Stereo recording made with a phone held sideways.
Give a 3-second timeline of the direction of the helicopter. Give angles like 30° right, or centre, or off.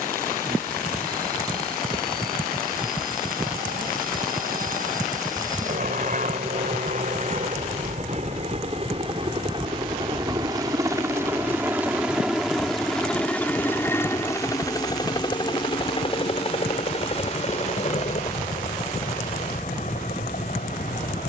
70° right, 60° right, 50° right, 20° right, 10° left, 30° left, 50° left.